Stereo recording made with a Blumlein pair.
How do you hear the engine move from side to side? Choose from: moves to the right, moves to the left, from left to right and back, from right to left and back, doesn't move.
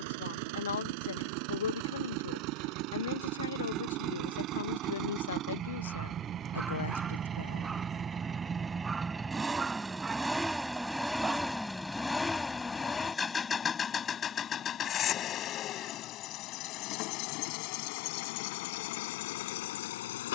moves to the left.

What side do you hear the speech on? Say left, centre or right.
left.